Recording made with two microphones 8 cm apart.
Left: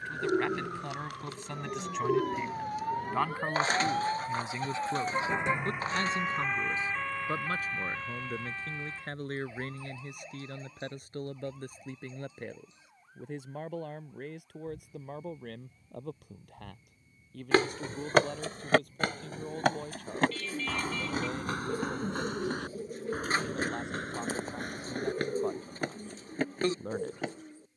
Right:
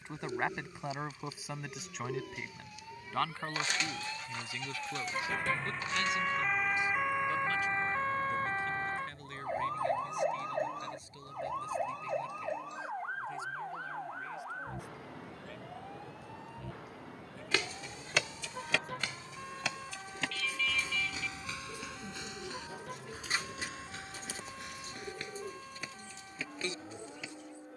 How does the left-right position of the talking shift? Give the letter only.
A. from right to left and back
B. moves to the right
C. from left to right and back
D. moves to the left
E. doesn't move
D.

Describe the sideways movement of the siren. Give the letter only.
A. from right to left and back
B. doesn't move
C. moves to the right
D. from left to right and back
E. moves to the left
C.